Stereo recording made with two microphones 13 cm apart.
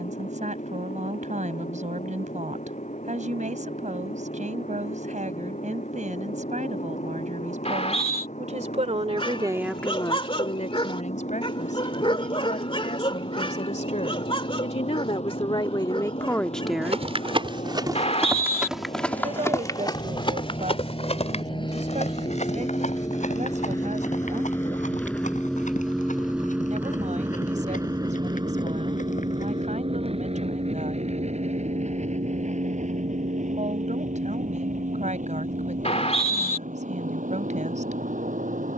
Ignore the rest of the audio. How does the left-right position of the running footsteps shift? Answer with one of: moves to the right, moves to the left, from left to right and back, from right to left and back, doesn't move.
moves to the left.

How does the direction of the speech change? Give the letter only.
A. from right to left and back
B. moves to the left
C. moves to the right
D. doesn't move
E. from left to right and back
A.